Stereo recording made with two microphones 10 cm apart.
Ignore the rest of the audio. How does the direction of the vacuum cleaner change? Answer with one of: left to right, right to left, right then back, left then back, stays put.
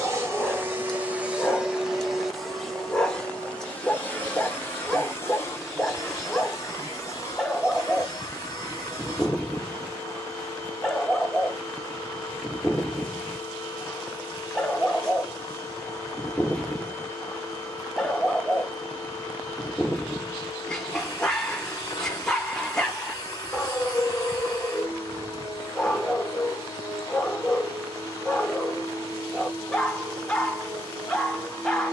right to left.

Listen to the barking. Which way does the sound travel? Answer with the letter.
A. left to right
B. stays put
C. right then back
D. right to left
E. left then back
B.